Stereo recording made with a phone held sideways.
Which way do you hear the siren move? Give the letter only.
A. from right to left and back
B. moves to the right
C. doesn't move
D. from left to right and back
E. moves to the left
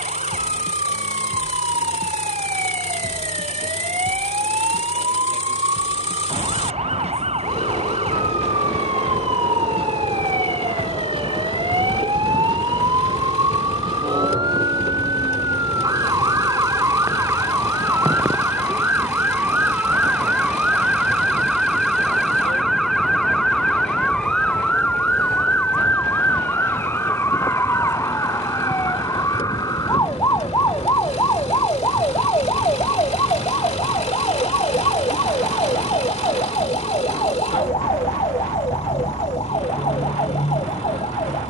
E.